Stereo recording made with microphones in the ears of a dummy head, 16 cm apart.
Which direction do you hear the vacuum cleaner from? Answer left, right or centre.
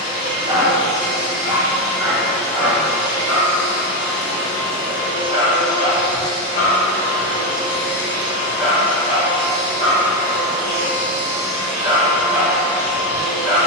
left.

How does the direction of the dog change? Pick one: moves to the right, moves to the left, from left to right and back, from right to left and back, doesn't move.
from right to left and back.